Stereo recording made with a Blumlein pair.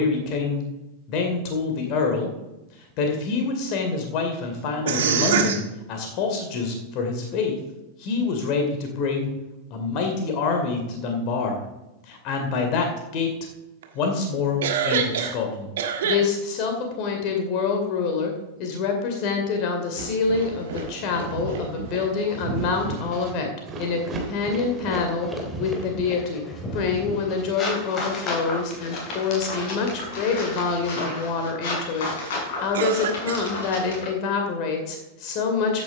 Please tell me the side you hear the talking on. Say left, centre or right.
left.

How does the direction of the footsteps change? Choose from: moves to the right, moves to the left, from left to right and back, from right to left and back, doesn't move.
moves to the left.